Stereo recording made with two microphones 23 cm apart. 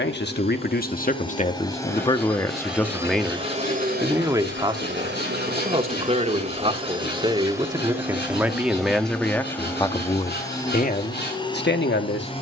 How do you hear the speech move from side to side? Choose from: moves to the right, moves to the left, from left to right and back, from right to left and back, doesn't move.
from left to right and back.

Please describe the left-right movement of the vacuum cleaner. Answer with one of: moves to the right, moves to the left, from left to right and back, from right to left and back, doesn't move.
from left to right and back.